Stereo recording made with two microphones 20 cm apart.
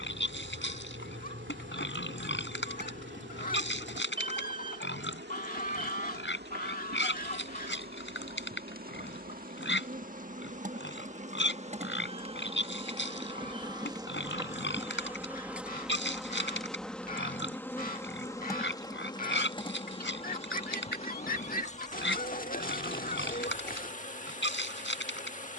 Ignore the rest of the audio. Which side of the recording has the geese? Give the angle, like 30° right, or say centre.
40° left.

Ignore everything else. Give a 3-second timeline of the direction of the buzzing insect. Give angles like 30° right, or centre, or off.
70° right, 60° right, 50° right, 40° right, 20° right, centre, 20° left, 40° left, 40° left.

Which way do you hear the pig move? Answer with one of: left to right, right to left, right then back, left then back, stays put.
stays put.